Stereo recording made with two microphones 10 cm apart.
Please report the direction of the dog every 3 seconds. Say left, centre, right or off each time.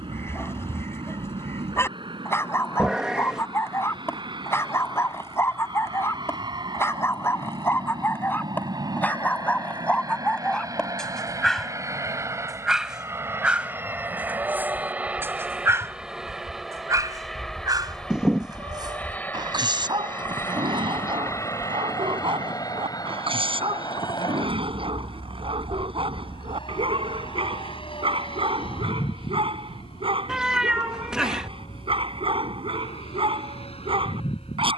left, left, left, centre, centre, right, right, right, right, right, right, right.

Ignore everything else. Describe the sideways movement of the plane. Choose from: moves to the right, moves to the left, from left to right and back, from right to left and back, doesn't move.
moves to the left.